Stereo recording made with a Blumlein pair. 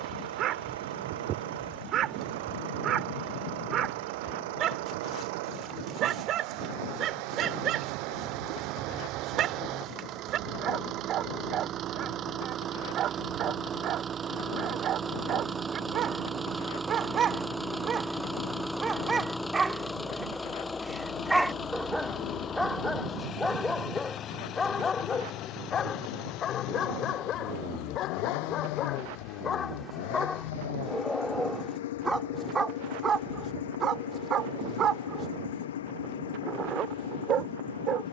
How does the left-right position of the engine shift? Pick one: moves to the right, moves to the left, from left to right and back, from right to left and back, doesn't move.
moves to the left.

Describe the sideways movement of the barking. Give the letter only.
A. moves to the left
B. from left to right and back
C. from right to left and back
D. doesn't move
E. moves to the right
C.